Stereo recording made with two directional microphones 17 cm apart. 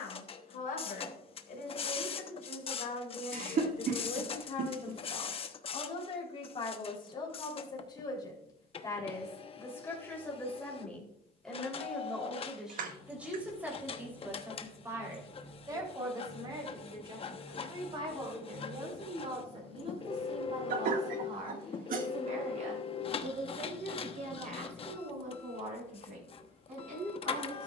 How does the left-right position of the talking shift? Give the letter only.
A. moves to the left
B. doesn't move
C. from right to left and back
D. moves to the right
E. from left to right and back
D.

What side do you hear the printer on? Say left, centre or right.
left.